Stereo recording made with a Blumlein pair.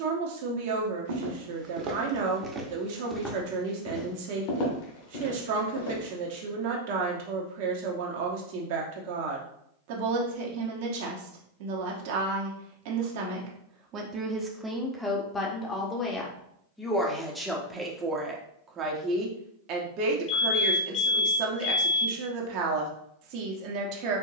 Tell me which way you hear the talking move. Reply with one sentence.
You can hear the talking move from right to left and back again.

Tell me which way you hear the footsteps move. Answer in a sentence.
In this clip you hear the footsteps move from right to left.